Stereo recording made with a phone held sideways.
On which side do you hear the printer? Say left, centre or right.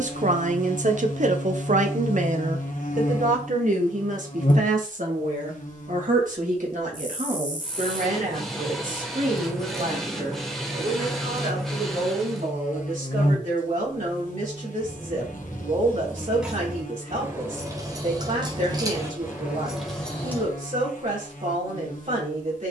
centre.